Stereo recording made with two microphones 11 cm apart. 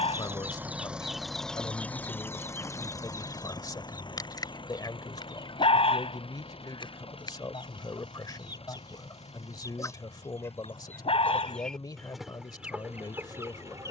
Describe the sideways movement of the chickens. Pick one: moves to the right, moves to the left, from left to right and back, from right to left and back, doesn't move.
from right to left and back.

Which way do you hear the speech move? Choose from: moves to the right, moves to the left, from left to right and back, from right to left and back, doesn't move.
doesn't move.